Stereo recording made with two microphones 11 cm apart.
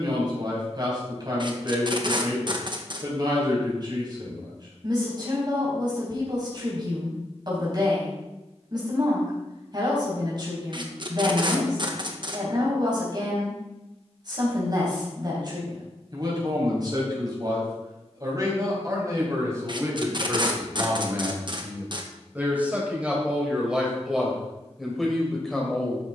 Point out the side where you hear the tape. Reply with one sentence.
In this clip you hear the tape on the right.